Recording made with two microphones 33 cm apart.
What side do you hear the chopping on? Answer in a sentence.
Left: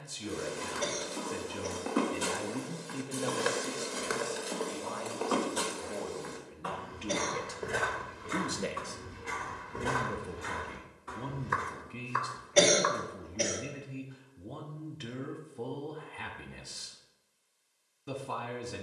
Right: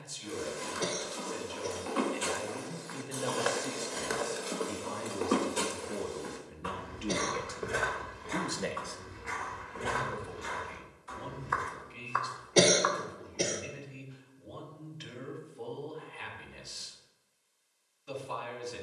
In this clip you hear the chopping on the left.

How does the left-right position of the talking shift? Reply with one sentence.
You can hear the talking go right and come back.